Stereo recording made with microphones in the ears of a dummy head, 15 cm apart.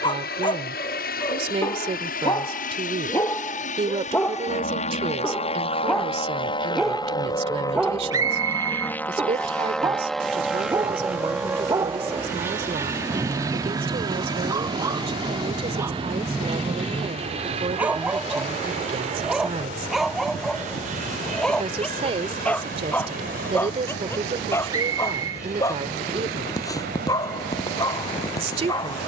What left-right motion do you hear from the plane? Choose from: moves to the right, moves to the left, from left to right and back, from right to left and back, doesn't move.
moves to the right.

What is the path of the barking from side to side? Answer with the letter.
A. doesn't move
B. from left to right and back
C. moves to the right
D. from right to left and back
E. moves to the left
B.